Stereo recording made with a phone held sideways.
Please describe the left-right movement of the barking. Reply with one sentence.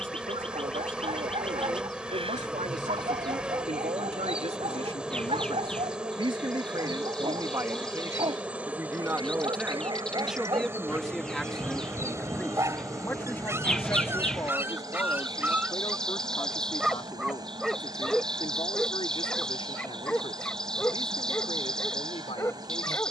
You can hear the barking go from the right side to the left.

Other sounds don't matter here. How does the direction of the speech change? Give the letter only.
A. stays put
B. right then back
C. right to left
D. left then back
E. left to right
C.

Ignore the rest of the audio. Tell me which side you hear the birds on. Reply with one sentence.
You can hear the birds in the centre.